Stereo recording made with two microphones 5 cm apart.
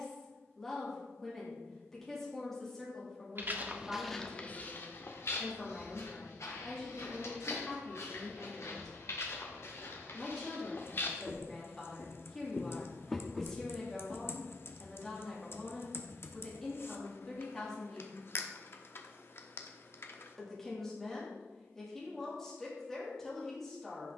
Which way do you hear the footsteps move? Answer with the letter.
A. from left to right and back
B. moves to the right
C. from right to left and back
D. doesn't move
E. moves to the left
C.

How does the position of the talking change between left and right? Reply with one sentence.
You can hear the talking stay put.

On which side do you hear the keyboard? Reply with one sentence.
In this clip you hear the keyboard on the left.